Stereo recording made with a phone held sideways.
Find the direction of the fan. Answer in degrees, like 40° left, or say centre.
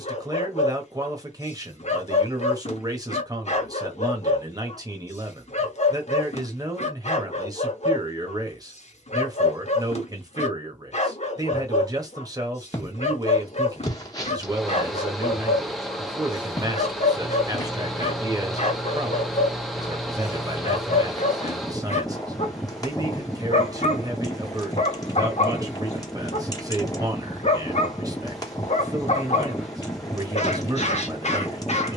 centre.